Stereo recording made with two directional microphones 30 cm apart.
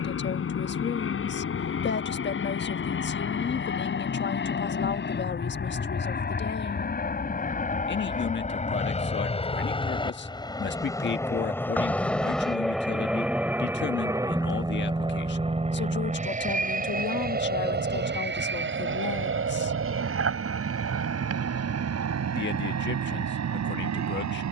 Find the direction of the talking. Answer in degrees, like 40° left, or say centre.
40° left.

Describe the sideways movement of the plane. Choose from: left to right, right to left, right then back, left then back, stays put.
left to right.